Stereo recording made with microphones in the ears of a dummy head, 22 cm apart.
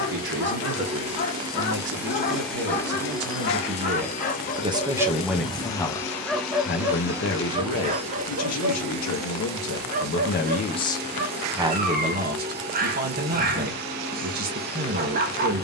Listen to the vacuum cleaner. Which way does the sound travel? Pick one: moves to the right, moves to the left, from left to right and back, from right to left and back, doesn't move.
from right to left and back.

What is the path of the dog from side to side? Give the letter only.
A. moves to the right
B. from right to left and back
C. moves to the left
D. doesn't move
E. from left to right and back
A.